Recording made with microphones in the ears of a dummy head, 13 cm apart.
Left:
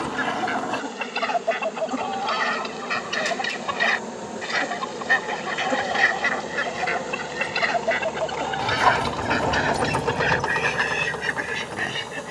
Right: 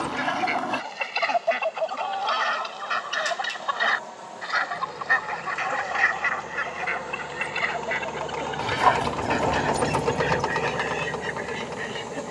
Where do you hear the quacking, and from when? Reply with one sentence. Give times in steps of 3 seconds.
In this clip you hear the quacking in the centre from 0 s and on the left from 3 s.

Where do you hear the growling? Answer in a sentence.
In this clip you hear the growling in the centre.